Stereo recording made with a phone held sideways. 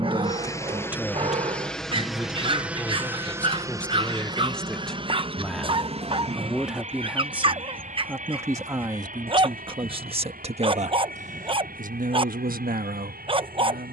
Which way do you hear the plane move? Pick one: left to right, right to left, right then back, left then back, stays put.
left to right.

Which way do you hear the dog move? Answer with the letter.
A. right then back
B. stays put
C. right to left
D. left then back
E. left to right
B.